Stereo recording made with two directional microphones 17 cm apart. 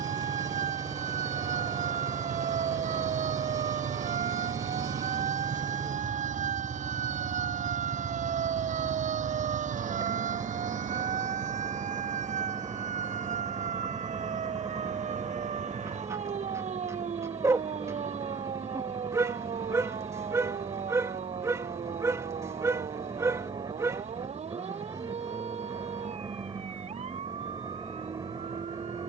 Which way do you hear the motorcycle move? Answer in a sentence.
You can hear the motorcycle stay in one place.